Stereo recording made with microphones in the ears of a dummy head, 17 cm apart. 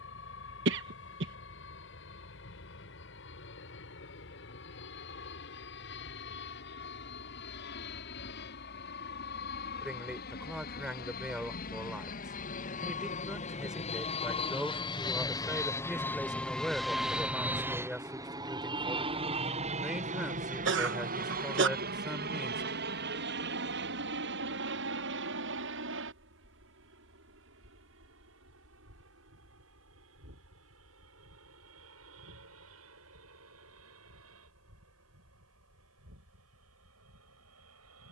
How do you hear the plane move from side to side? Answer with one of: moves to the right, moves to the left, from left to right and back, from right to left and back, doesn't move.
moves to the right.